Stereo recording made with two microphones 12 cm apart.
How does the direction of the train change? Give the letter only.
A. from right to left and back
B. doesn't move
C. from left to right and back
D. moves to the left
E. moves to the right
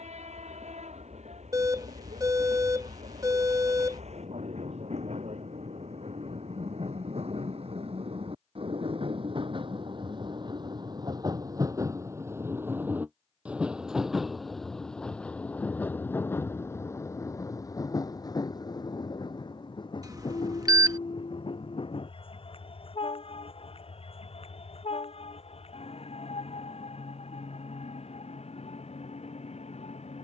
D.